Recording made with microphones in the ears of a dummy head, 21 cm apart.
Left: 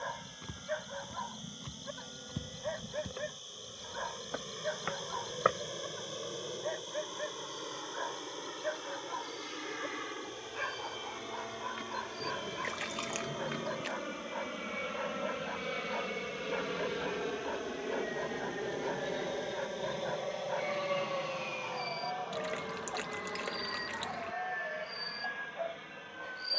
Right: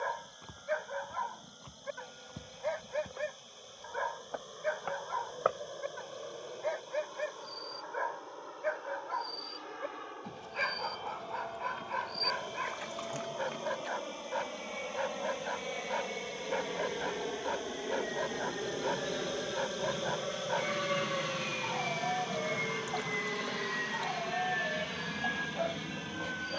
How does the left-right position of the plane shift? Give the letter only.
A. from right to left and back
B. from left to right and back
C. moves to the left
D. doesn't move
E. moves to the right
E.